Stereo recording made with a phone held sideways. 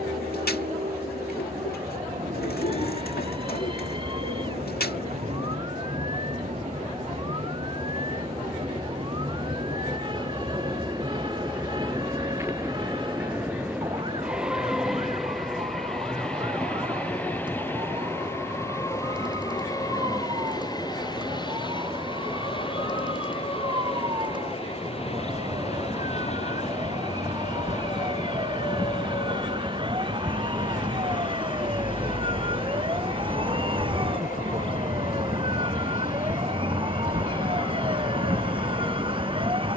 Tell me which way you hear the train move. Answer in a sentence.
In this clip you hear the train move to the left.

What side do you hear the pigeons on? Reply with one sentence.
In this clip you hear the pigeons on the left.